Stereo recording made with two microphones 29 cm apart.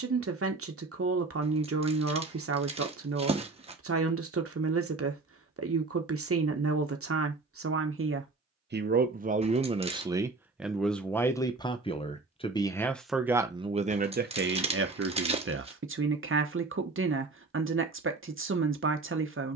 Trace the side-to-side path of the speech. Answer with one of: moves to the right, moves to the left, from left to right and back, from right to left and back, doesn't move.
from right to left and back.